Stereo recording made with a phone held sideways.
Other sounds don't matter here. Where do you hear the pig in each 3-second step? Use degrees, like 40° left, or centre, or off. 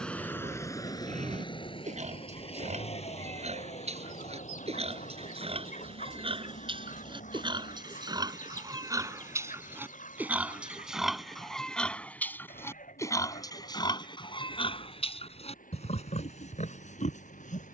50° right, 50° right, 30° right, 10° right, 30° left, 50° left.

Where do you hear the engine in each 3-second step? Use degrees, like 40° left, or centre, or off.
30° left, 50° left, 60° left, 60° left, 70° left, 70° left.